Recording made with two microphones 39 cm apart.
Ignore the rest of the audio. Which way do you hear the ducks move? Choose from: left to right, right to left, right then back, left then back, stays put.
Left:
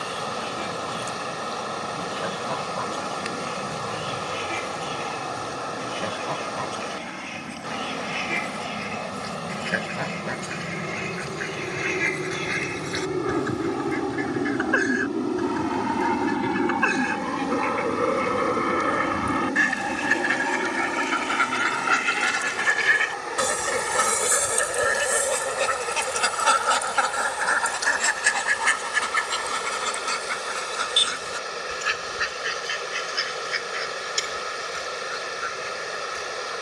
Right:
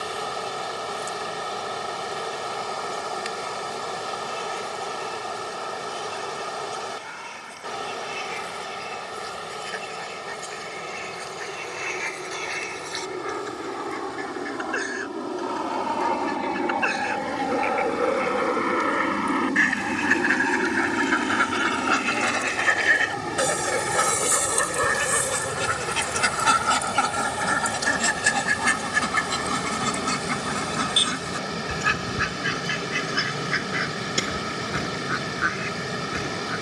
left to right.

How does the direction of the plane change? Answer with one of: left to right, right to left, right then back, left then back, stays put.
left to right.